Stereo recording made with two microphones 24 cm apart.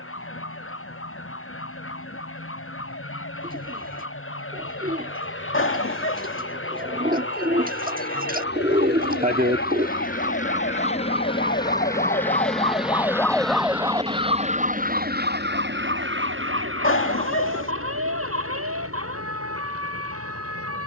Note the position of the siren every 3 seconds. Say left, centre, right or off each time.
left, left, left, left, centre, right, right.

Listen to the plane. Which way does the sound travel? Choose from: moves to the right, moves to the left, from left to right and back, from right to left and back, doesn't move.
moves to the right.